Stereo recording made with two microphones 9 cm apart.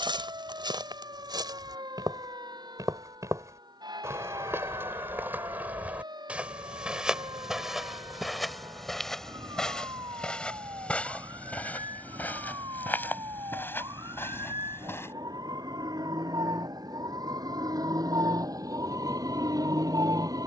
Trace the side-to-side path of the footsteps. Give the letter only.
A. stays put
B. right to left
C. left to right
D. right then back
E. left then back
B.